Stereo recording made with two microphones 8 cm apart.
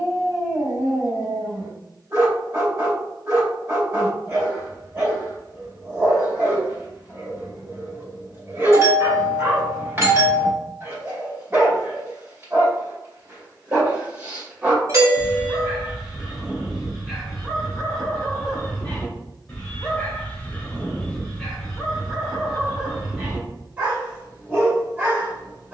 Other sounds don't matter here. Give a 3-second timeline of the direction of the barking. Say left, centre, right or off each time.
right, right, right, right, right, centre, centre, centre, right.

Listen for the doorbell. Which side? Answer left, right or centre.
right.